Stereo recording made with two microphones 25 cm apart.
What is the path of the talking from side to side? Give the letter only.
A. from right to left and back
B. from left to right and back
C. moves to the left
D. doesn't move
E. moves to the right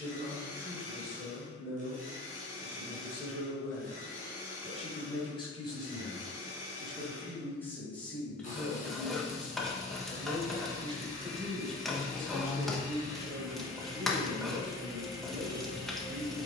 E.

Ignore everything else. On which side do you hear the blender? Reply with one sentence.
In this clip you hear the blender on the left.